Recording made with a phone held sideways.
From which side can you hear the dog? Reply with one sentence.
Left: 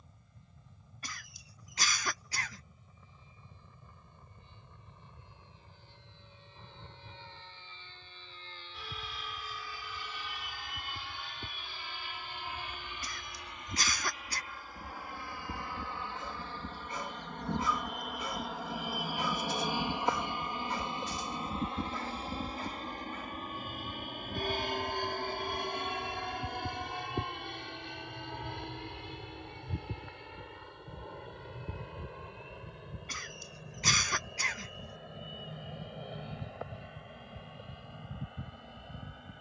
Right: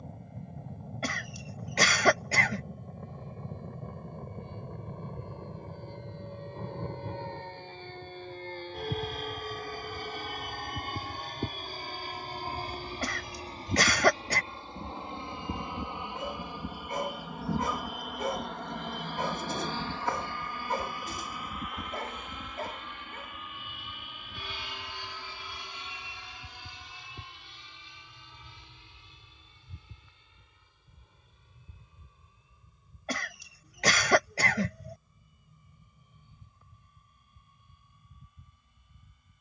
You can hear the dog on the right.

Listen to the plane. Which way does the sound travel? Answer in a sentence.
You can hear the plane go from the right side to the left.